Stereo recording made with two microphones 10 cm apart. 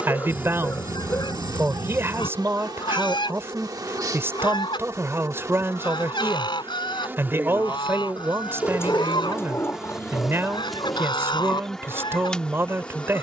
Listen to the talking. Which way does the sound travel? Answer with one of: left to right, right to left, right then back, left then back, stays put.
stays put.